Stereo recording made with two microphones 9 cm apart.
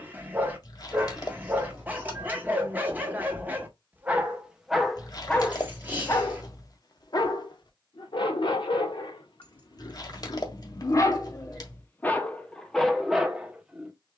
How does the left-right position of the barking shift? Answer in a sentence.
You can hear the barking move from right to left and back again.